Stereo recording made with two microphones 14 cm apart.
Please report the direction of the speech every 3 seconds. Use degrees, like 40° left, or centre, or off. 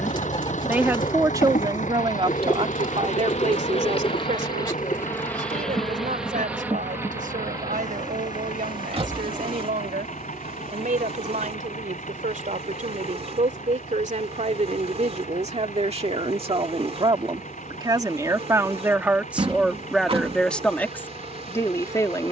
30° right, 60° right, 70° right, 70° right, 60° right, 40° right, 10° right, 20° left.